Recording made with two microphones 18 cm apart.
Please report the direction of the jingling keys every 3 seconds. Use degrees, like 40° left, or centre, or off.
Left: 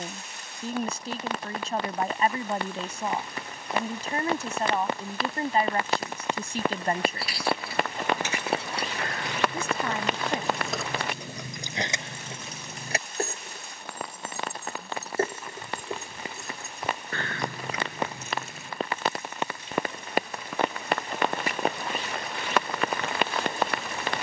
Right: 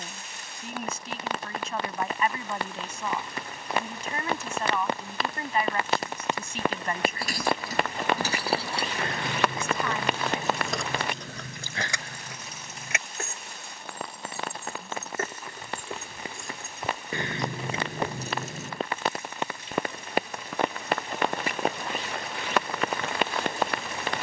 off, off, 40° right, centre, 40° left, centre, 40° right, off.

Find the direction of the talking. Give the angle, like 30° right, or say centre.
40° left.